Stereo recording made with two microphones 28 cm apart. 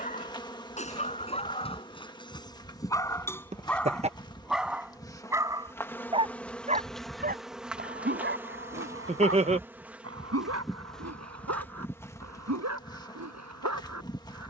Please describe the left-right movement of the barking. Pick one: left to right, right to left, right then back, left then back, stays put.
left to right.